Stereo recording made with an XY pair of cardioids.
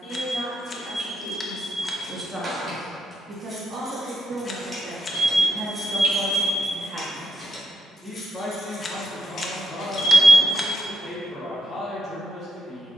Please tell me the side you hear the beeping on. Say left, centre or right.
left.